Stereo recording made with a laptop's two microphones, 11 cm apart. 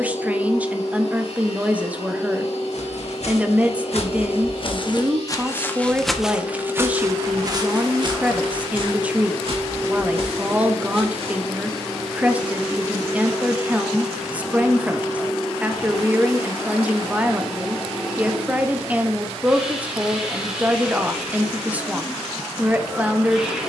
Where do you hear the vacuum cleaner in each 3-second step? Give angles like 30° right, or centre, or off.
60° left, 60° left, 50° left, 20° left, 10° right, 10° right, 10° right, 10° right.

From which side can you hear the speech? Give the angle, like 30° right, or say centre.
10° right.